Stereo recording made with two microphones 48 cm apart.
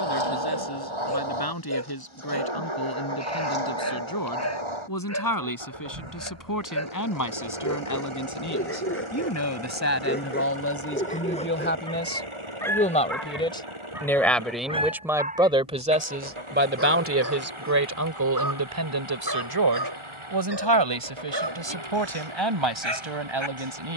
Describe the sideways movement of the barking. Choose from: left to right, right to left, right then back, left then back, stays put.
left to right.